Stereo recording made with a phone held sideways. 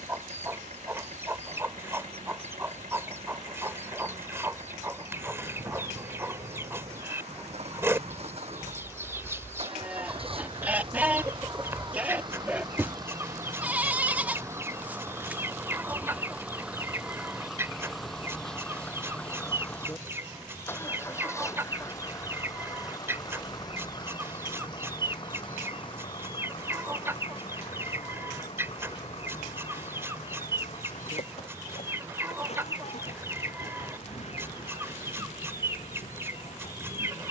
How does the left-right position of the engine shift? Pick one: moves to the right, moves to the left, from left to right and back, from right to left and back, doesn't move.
moves to the left.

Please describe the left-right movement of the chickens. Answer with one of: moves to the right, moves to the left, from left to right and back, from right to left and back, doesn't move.
doesn't move.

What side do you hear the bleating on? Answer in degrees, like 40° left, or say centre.
10° right.